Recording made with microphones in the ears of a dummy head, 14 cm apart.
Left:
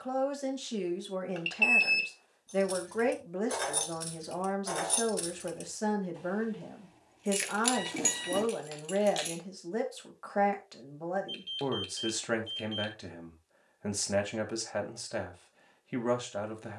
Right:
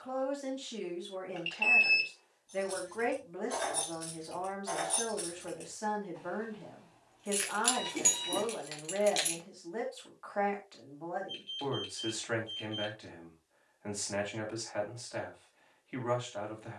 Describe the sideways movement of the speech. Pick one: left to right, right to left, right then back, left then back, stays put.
stays put.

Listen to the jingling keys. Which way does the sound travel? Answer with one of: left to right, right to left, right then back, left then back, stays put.
left to right.